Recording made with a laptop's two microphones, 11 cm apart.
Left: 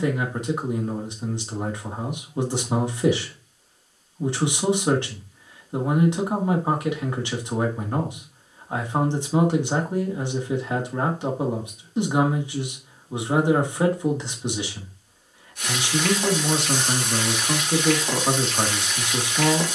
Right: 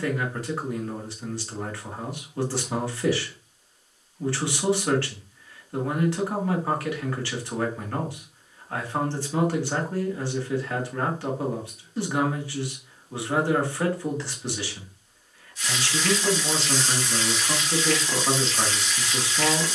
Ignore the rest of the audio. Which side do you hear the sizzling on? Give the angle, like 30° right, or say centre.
50° left.